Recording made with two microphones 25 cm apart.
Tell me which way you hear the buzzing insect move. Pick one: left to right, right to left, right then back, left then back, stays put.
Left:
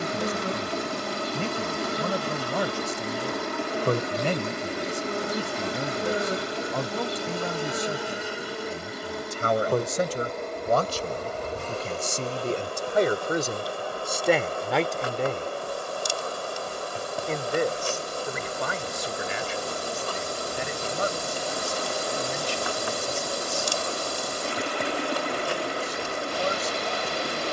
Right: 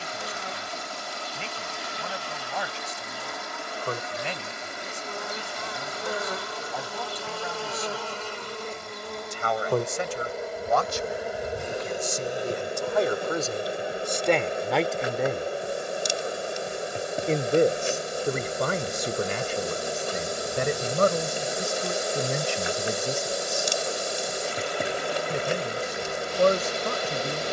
left to right.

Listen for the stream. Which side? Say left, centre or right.
left.